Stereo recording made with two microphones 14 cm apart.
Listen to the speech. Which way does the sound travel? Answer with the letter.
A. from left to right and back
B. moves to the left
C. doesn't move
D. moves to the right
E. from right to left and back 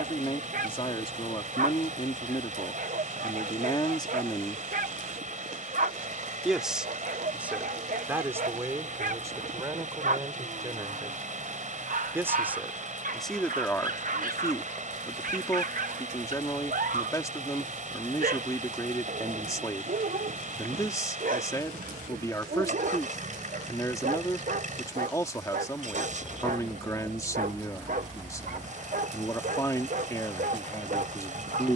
A.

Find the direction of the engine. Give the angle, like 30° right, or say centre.
60° right.